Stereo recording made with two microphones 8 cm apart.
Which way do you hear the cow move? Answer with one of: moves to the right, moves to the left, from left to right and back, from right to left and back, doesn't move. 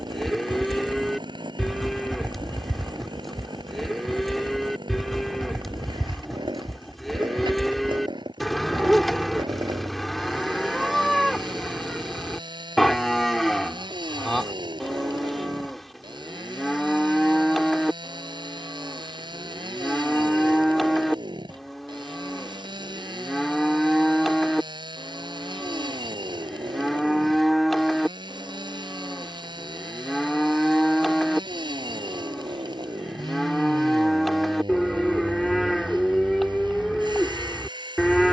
doesn't move.